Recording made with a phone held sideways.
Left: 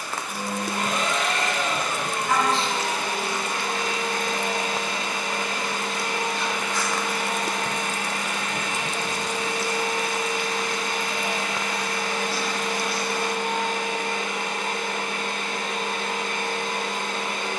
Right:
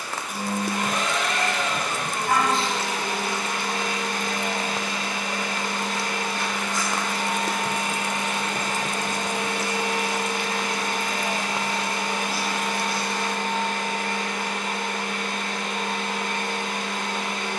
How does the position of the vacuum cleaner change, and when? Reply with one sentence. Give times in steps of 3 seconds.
In this clip you hear the vacuum cleaner on the left from 0 s, in the centre from 6 s, on the right from 9 s, in the centre from 12 s and on the left from 15 s.